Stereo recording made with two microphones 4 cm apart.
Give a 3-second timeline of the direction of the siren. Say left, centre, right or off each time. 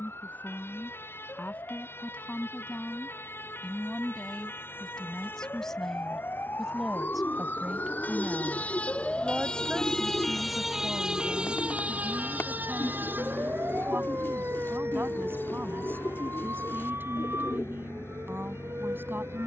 left, left, left, centre, right, right, right.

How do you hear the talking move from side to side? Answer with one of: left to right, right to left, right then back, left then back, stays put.
left to right.